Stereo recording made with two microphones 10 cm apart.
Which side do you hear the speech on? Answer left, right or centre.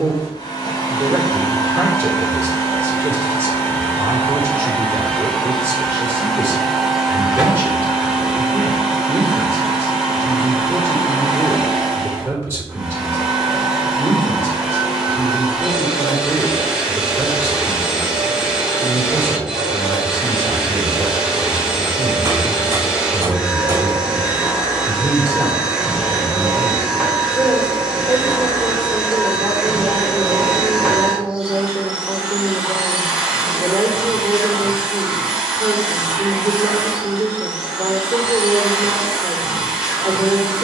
right.